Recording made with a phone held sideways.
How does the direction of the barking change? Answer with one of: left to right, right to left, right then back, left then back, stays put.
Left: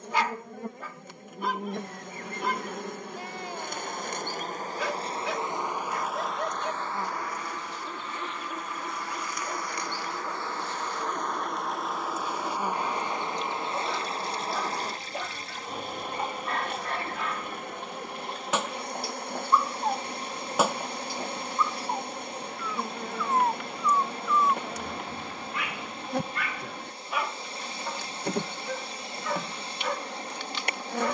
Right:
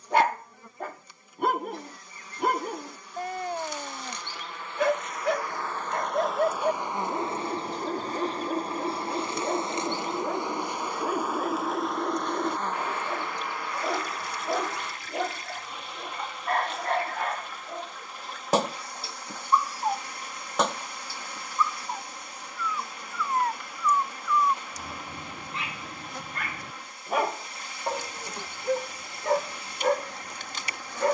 left then back.